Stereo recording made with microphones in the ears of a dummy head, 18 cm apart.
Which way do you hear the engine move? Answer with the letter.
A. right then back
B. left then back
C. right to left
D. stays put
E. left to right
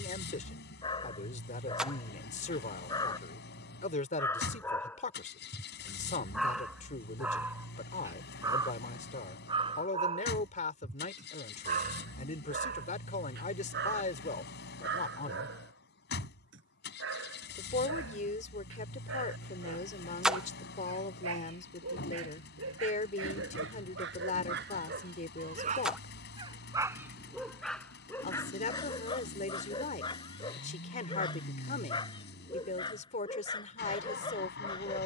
D.